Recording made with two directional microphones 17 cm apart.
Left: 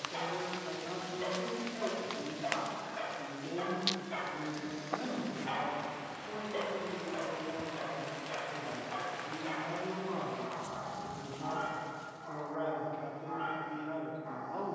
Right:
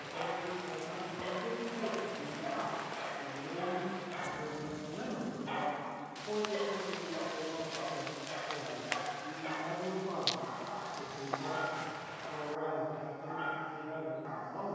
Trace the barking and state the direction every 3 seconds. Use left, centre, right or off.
left, left, centre, right, right.